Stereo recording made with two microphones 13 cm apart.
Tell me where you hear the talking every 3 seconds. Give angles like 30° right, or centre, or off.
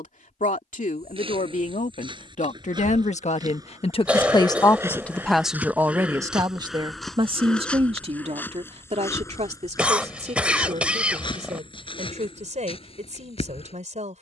70° left, 30° left, 40° right, 60° right, 60° right.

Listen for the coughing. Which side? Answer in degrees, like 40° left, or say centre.
10° right.